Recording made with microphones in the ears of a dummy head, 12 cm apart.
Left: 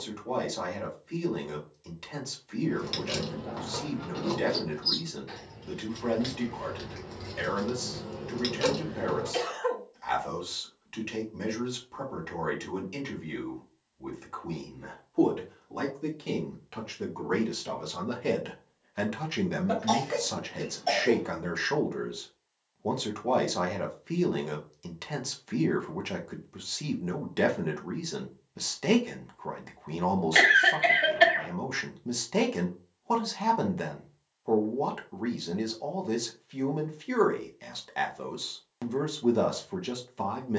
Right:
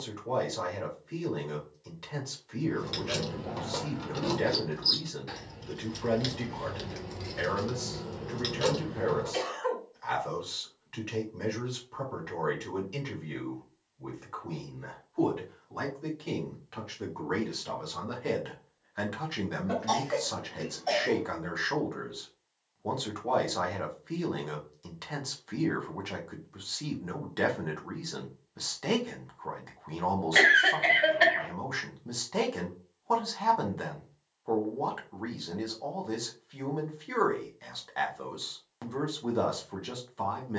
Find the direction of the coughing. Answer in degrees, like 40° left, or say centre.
30° left.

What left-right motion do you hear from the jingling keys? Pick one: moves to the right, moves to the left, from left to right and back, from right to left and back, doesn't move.
from left to right and back.